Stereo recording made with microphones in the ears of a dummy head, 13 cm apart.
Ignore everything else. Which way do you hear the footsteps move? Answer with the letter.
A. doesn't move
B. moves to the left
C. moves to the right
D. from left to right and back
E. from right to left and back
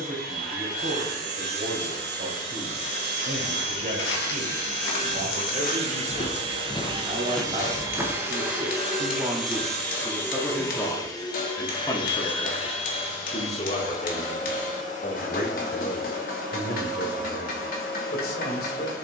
C.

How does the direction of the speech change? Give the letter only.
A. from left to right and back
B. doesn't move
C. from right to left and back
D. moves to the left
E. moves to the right
D.